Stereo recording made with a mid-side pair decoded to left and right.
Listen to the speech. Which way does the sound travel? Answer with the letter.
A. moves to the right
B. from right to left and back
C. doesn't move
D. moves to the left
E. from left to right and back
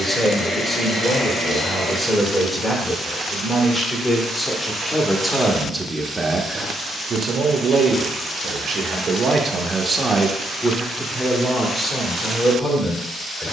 E.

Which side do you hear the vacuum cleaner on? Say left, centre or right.
left.